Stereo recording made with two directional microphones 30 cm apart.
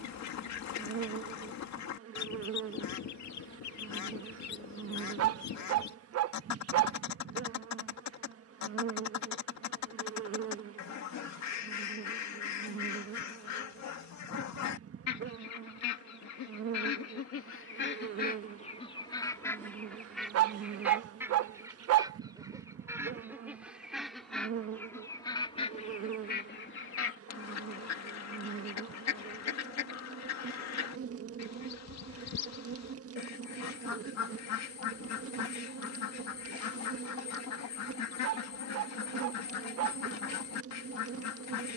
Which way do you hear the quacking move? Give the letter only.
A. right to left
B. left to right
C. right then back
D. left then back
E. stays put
C.